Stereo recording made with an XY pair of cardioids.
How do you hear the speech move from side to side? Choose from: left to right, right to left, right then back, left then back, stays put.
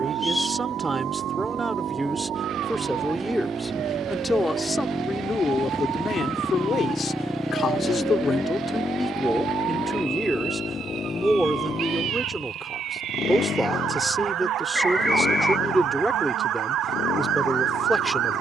left then back.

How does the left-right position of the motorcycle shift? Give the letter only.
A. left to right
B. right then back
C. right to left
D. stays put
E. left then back
C.